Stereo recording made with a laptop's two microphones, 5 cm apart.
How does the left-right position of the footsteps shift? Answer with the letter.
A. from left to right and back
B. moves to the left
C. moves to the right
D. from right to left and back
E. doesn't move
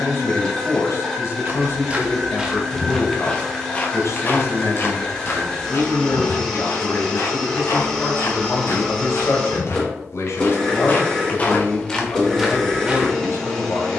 D.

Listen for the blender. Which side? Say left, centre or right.
centre.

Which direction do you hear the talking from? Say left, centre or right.
left.